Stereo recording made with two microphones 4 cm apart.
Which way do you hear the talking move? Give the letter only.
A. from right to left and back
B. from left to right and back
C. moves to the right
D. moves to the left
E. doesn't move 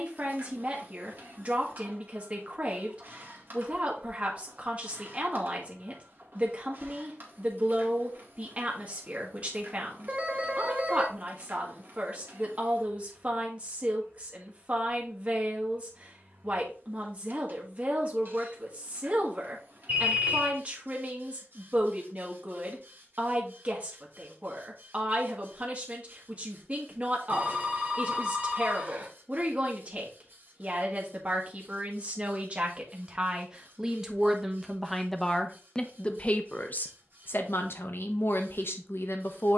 D.